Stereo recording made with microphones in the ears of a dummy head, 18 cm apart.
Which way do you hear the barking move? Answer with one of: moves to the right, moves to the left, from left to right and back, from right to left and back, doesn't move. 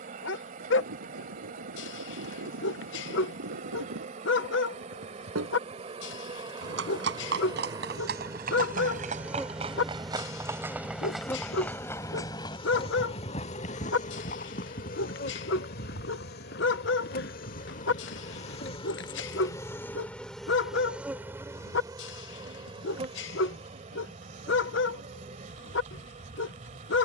doesn't move.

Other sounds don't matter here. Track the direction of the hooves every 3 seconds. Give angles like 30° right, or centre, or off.
80° right, 70° right, 50° right, 10° right, 30° left, 50° left, 60° left, off, off.